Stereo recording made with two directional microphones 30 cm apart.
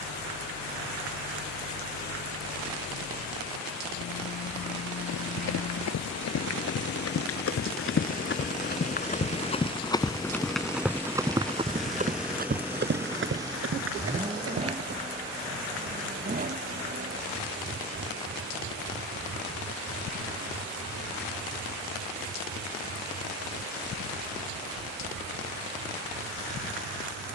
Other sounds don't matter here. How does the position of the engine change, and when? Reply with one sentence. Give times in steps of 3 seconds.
In this clip you hear the engine on the left from 0 s, in the centre from 9 s and on the right from 15 s.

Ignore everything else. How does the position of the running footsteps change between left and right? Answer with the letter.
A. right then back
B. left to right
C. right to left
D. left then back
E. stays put
B.